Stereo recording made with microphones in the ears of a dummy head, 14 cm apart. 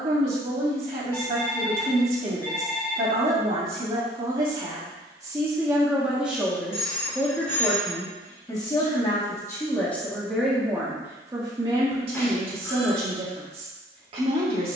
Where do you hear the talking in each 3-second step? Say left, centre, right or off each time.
right, right, centre, centre, right.